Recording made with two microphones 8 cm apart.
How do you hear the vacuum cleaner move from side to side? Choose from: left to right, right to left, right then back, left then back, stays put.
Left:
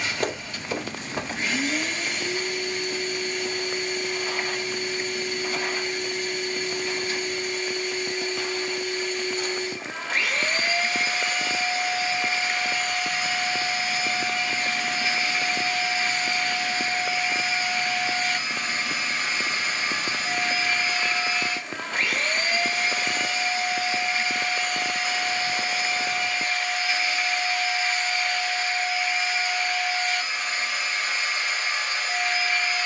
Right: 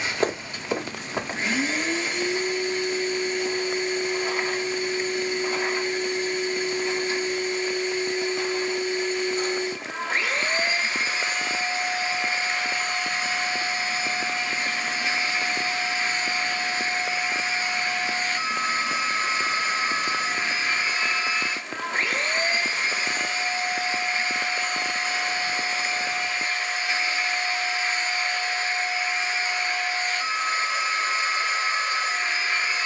stays put.